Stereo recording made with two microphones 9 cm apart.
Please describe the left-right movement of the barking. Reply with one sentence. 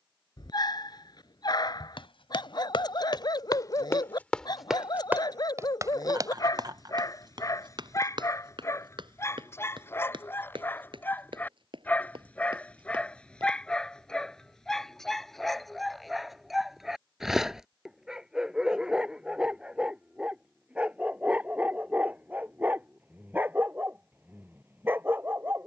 You can hear the barking move to the right.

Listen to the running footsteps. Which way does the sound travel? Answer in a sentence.
In this clip you hear the running footsteps move to the right.